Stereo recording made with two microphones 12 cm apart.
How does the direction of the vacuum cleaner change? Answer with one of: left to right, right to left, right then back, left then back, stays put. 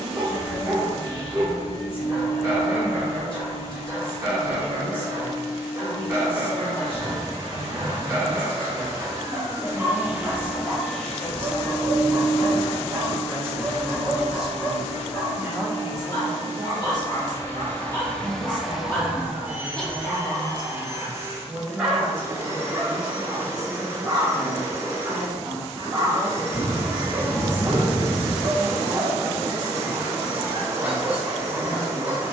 left then back.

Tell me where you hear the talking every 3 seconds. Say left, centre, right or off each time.
left, left, left, left, centre, right, right, right, right, right, right.